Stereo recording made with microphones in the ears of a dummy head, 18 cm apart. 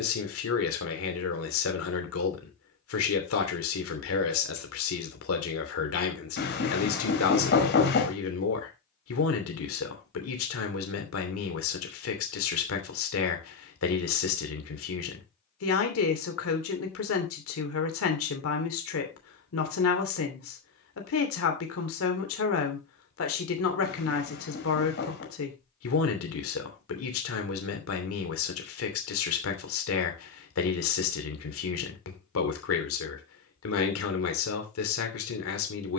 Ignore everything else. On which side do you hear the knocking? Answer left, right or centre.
left.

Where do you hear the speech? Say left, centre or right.
left.